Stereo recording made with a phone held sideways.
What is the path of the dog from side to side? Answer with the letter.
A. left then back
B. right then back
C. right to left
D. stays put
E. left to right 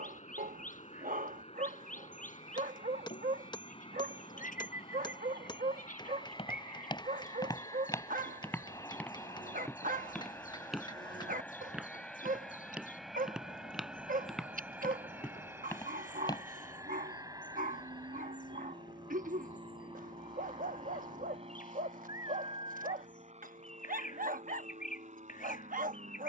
D.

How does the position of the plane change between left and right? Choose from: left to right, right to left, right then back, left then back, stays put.
left to right.